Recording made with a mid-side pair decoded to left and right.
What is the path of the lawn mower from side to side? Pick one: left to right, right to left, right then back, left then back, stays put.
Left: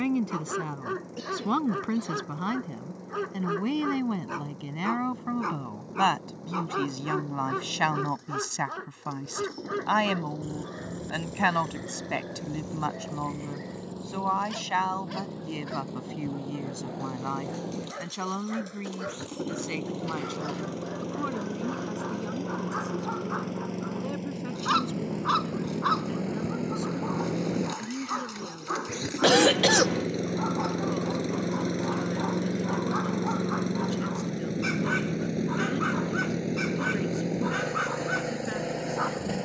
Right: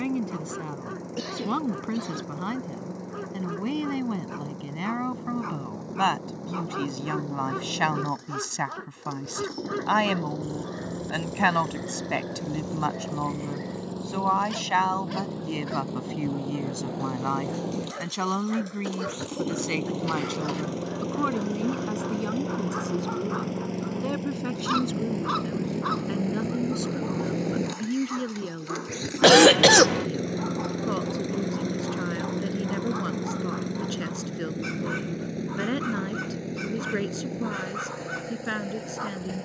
right to left.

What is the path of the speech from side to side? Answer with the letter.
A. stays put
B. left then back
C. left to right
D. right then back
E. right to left
C.